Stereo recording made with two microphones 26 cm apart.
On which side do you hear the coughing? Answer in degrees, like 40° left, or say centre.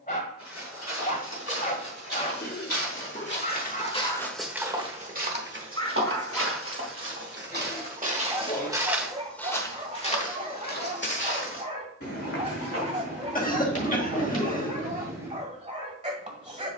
30° left.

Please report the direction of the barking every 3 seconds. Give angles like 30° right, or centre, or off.
30° left, 30° left, centre, 30° right, 30° right, 30° right.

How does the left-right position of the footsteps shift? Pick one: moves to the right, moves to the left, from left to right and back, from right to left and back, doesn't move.
from left to right and back.